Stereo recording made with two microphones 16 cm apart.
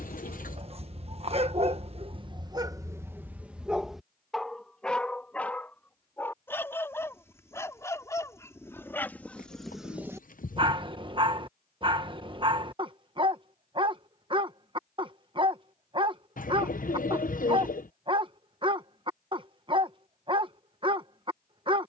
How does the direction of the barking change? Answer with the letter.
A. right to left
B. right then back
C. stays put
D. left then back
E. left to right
D.